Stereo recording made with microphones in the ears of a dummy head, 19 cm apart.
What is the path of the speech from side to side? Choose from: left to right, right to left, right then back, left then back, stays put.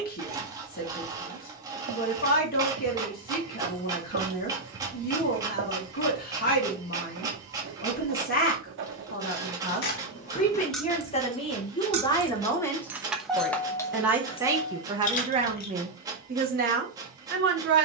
left to right.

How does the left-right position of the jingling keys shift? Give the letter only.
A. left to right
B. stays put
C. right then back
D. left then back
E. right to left
C.